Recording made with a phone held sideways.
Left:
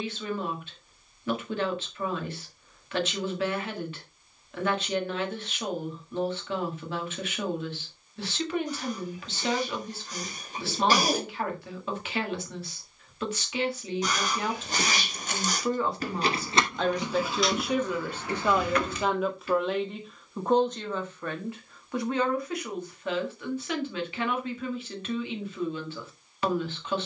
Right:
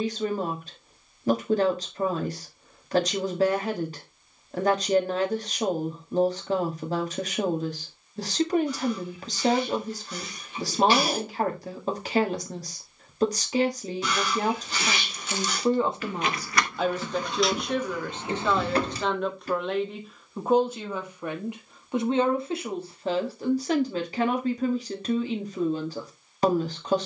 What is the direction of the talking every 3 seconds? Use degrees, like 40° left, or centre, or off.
40° right, 40° right, 40° right, 40° right, 40° right, 10° right, centre, 30° right, 40° right.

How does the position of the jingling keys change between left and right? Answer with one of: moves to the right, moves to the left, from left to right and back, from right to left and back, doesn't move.
moves to the right.